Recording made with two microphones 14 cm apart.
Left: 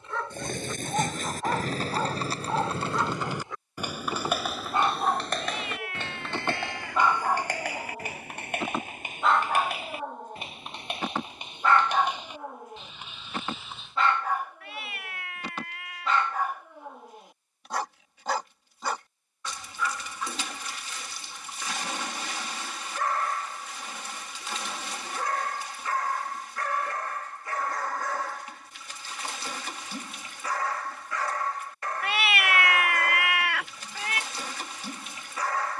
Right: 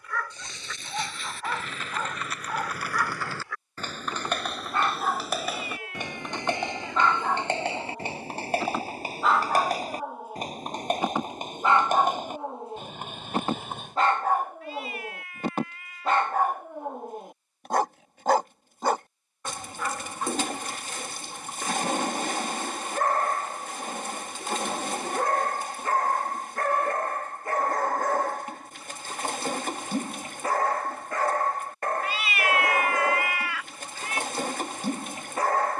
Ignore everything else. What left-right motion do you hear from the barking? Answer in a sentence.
In this clip you hear the barking go from the left side to the right.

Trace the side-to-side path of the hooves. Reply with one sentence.
You can hear the hooves travel towards the right.